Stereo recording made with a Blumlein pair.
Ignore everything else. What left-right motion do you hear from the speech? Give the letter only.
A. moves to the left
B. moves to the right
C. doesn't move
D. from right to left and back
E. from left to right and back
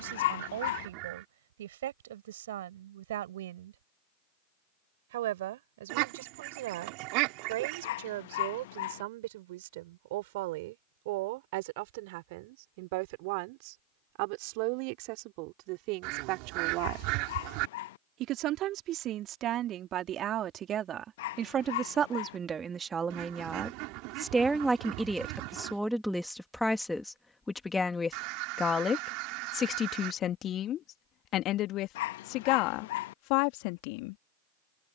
A.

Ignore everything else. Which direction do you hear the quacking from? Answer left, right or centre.
right.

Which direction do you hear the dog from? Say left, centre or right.
left.